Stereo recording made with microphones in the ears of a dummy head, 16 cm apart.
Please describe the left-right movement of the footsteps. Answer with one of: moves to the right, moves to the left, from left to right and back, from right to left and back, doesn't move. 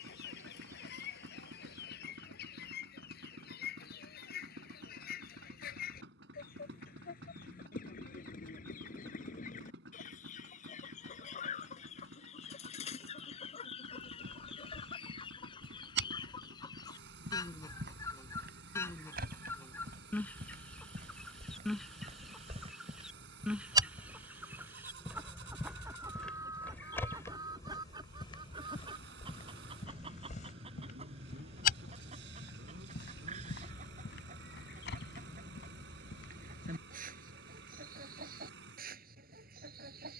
moves to the left.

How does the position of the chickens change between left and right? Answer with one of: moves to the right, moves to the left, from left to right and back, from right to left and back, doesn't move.
moves to the right.